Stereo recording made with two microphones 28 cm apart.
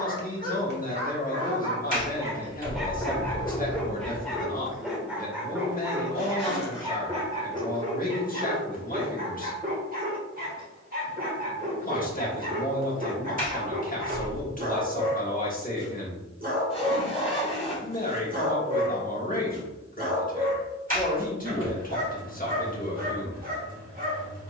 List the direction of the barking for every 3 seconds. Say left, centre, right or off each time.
right, centre, right, right, right, right, right, right.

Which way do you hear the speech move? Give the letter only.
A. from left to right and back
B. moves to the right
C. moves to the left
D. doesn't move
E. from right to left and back
D.